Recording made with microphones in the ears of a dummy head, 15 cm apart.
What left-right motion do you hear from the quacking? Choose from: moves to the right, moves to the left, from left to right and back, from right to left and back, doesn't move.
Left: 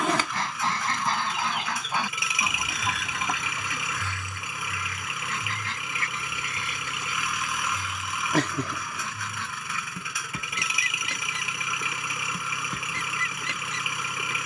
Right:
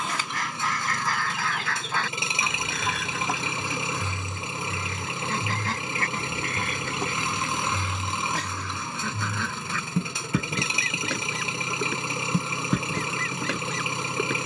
moves to the right.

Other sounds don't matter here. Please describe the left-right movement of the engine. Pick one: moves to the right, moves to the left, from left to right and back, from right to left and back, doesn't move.
doesn't move.